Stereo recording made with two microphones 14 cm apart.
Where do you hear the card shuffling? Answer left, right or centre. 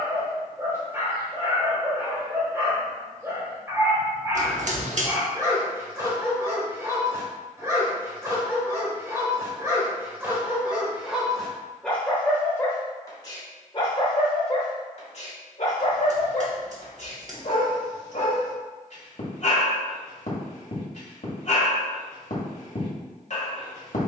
right.